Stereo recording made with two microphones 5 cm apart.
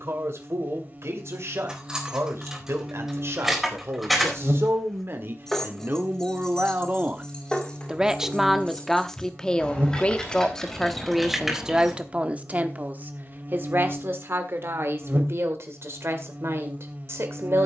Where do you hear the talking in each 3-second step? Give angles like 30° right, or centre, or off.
60° right, 50° right, 20° right, centre, 40° right, 60° right.